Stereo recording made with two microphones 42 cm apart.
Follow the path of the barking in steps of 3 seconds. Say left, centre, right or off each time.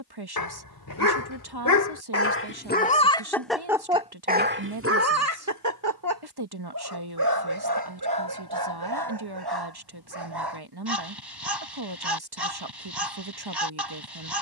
left, right, right, right, right.